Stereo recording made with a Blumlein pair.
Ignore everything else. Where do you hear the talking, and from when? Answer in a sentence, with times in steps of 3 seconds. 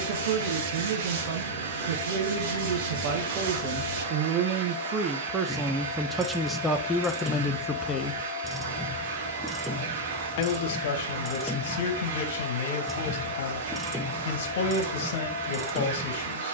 You can hear the talking on the right from 0 s, in the centre from 6 s and on the left from 9 s.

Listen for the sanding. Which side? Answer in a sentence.
In this clip you hear the sanding on the right.